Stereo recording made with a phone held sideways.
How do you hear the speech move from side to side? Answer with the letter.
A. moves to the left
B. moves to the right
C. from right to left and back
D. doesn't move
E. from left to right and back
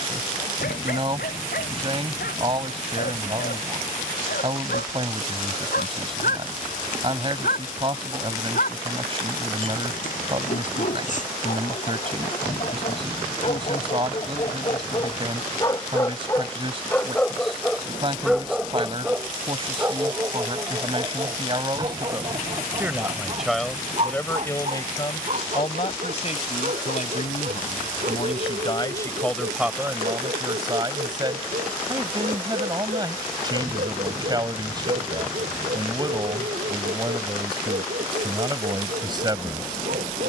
C.